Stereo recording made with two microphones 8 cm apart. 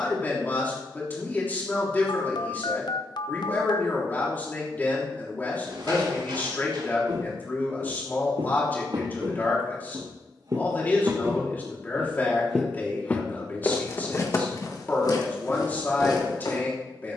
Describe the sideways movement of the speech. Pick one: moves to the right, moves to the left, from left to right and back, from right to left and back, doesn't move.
doesn't move.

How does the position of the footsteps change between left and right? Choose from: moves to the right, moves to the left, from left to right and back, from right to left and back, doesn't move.
moves to the left.